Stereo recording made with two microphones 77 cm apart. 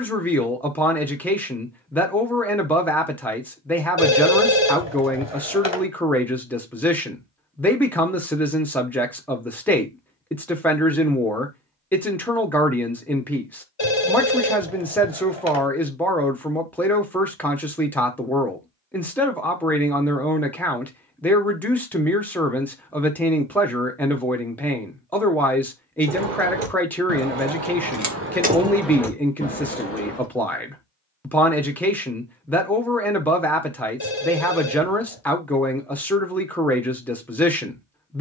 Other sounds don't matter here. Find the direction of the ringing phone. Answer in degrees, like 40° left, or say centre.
30° left.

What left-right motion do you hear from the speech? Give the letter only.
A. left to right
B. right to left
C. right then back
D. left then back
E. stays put
E.